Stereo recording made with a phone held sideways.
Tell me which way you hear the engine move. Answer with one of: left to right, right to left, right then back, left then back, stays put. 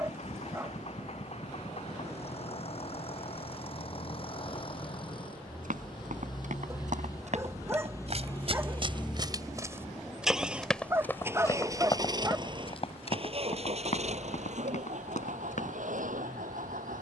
left to right.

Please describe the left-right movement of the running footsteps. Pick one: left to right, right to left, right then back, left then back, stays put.
right to left.